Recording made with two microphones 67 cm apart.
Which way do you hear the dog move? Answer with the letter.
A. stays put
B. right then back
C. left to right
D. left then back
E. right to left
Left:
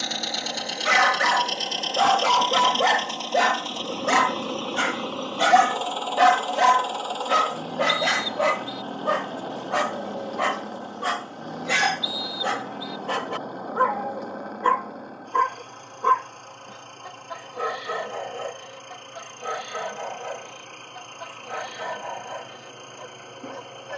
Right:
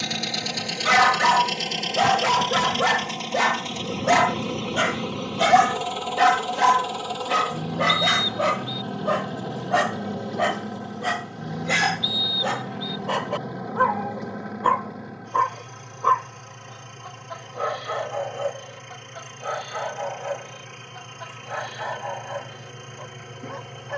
E.